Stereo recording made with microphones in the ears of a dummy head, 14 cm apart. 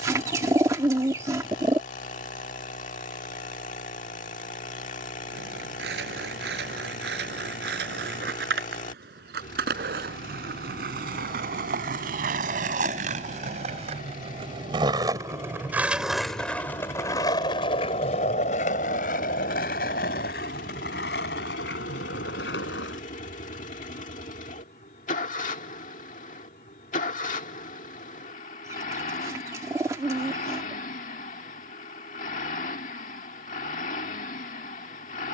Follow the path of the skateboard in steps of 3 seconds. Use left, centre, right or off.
off, right, right, right, right, centre, left, left, off, off, off, off.